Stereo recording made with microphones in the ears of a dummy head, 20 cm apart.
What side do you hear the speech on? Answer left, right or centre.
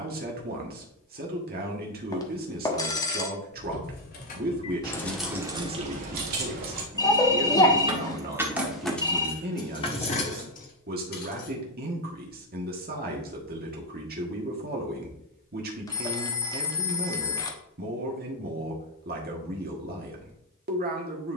right.